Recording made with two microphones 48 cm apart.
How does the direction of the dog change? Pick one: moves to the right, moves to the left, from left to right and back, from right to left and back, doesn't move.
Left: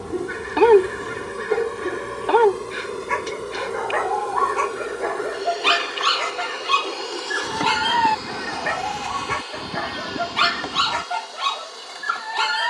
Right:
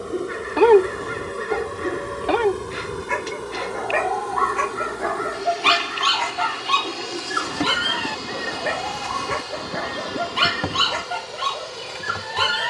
from left to right and back.